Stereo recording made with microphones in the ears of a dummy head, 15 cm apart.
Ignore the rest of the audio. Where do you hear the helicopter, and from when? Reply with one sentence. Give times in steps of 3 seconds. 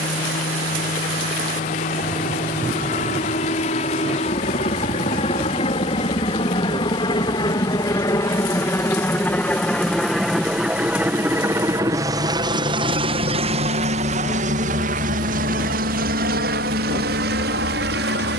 You can hear the helicopter on the left from 0 s, in the centre from 9 s and on the right from 12 s.